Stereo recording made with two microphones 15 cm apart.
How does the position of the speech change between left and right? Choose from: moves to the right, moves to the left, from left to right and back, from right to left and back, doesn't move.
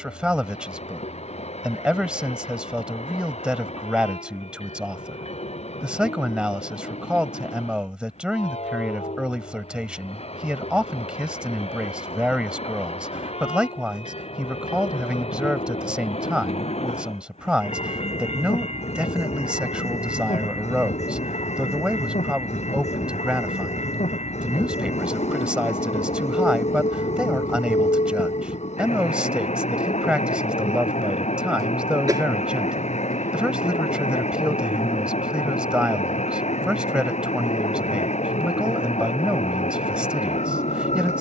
doesn't move.